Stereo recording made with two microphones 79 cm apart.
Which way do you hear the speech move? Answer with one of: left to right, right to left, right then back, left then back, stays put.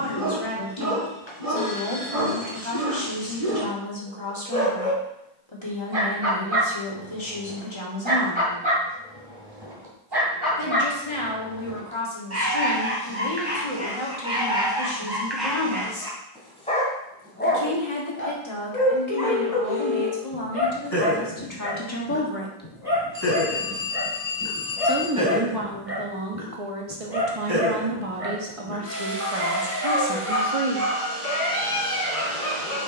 left to right.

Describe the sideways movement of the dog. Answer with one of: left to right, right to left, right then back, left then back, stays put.
left then back.